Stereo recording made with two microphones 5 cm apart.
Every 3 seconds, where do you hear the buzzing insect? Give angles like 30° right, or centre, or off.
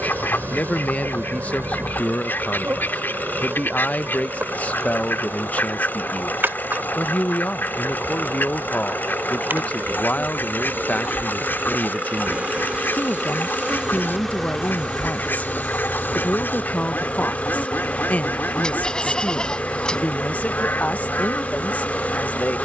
50° right, 50° right, 50° right, 40° right, 10° right, 20° left, 30° left, 30° left.